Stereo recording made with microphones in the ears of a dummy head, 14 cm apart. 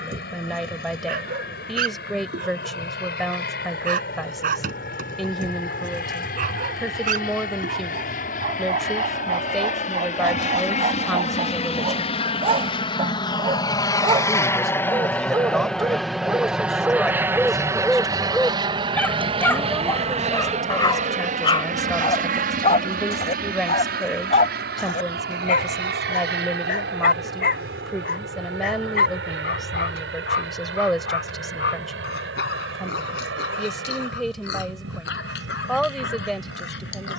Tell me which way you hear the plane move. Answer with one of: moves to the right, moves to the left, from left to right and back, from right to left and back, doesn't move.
moves to the right.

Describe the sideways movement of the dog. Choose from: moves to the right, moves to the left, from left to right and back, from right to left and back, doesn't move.
moves to the left.